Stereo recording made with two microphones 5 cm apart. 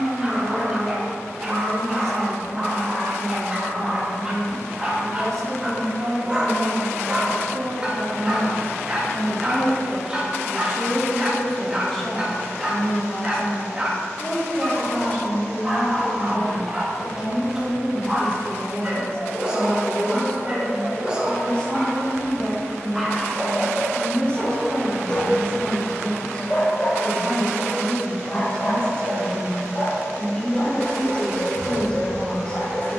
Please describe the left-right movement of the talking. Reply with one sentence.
In this clip you hear the talking move from right to left.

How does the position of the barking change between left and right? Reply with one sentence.
You can hear the barking move from right to left.